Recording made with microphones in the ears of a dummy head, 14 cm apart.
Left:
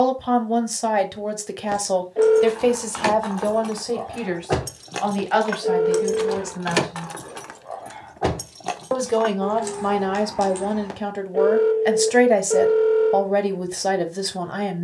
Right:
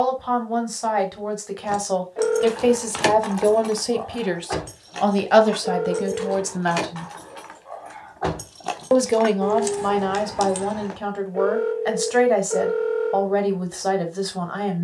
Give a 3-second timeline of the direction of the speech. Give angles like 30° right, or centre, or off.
20° left, 30° right, 50° right, 10° left, 20° left.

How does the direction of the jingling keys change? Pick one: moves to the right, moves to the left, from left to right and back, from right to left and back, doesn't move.
from right to left and back.